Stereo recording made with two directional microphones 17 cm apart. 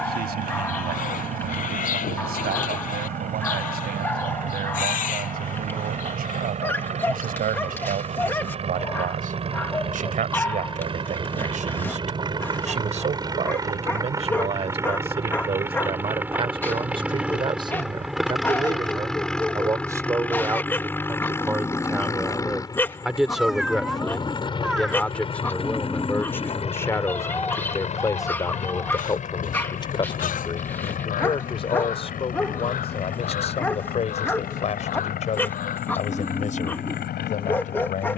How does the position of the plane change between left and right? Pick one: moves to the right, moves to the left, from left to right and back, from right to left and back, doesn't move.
moves to the left.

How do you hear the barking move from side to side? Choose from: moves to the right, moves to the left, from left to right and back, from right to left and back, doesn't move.
doesn't move.